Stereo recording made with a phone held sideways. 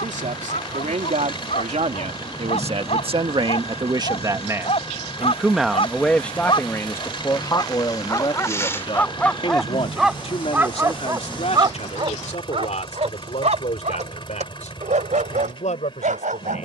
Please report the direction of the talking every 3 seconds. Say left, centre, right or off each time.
right, right, left, left, left, left.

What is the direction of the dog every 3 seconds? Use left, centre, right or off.
left, left, left, centre, right, right.